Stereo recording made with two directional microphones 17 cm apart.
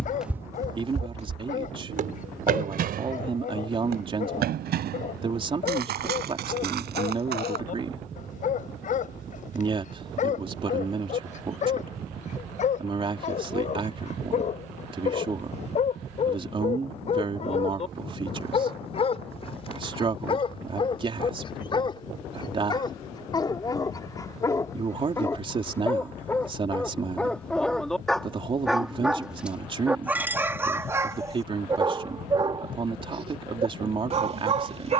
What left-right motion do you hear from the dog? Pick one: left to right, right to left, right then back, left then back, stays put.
left to right.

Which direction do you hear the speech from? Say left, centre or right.
right.